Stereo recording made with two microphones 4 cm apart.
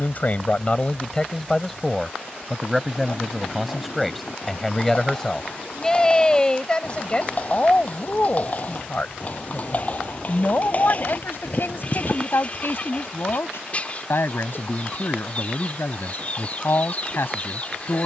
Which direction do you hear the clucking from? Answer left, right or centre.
left.